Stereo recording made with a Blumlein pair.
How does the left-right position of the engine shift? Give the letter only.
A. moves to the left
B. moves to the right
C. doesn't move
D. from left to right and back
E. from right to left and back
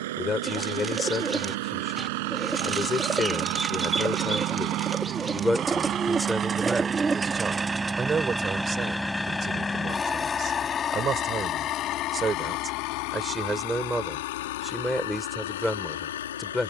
A.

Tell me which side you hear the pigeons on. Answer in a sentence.
You can hear the pigeons in the centre.